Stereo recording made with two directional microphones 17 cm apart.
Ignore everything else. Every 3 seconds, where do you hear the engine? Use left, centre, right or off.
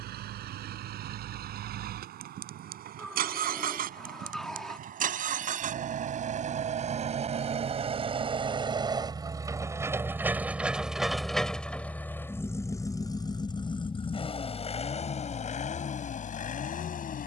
right, right, right, centre, left, left.